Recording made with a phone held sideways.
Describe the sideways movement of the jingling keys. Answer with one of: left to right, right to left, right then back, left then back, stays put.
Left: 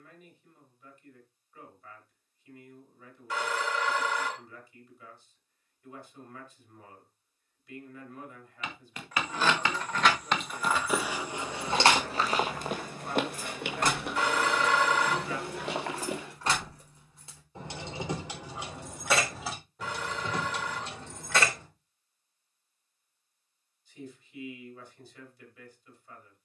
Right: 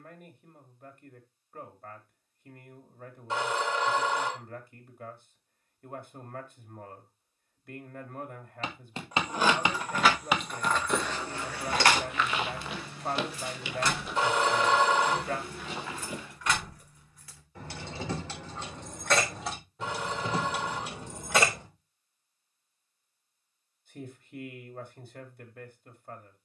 left then back.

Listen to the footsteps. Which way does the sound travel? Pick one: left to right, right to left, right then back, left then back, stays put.
right to left.